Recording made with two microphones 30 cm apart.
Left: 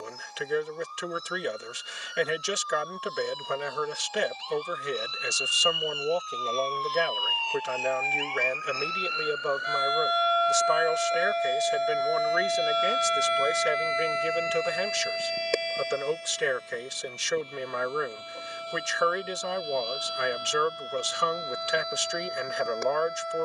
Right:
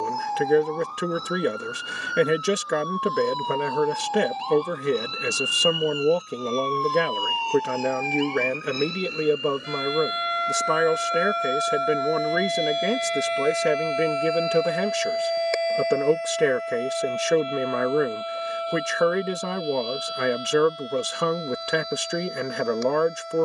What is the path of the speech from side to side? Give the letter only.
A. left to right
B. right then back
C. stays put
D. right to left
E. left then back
C.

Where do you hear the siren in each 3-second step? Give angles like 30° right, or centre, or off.
80° right, 70° right, 50° right, 20° right, 20° left, 40° left, 60° left, 60° left.